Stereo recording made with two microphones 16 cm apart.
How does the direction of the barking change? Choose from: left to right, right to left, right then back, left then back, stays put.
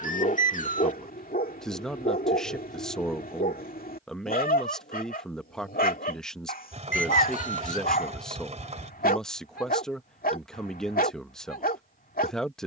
stays put.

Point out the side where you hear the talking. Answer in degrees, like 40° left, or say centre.
centre.